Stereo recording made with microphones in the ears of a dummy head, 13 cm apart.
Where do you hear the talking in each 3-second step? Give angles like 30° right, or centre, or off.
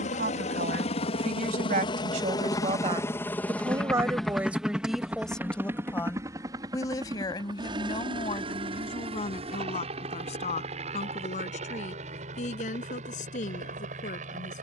50° right, 10° right, 30° left, 50° left, 50° left.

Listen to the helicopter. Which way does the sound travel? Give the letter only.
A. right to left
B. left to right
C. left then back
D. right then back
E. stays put
B.